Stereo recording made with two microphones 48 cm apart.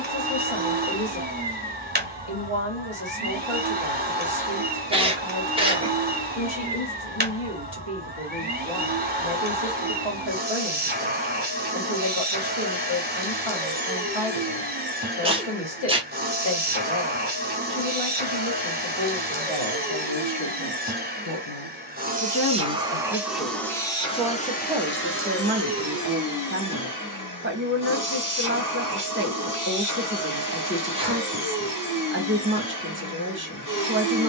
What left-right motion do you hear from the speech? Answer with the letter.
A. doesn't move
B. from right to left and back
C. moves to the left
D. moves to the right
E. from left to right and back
D.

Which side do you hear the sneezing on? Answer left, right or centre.
centre.